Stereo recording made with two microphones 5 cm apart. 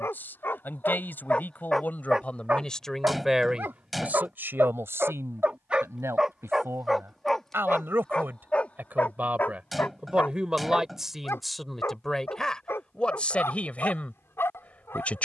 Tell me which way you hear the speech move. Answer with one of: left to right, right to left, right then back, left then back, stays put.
right then back.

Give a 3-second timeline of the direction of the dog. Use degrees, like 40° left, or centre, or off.
20° left, 40° right, 10° left, 40° left, 50° left.